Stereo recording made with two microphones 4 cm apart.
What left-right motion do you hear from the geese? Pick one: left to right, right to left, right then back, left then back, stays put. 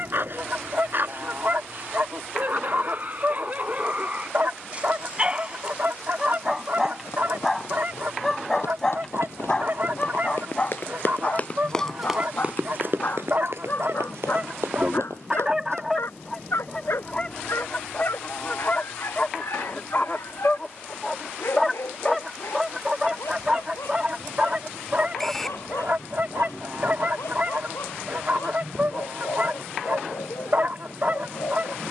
left then back.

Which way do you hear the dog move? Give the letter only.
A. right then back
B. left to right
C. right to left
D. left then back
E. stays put
C.